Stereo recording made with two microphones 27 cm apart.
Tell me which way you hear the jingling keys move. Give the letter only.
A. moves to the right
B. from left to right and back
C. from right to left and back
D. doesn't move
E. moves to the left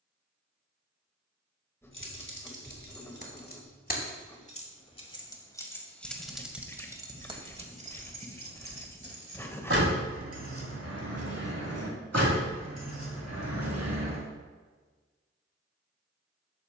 A.